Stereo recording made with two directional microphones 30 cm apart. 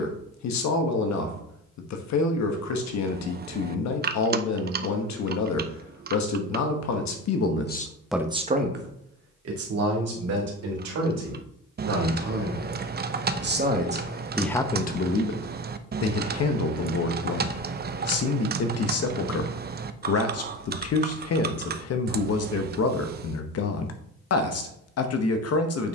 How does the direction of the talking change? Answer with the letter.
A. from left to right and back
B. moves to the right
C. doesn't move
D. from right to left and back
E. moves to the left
A.